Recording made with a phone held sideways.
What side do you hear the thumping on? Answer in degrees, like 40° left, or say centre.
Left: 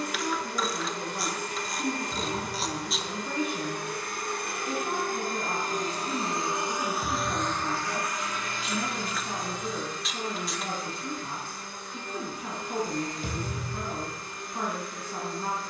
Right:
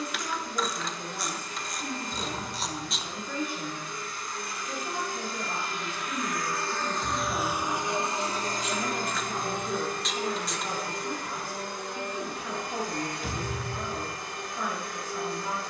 40° left.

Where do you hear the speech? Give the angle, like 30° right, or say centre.
60° left.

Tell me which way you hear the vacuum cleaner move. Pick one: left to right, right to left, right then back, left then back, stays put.
left to right.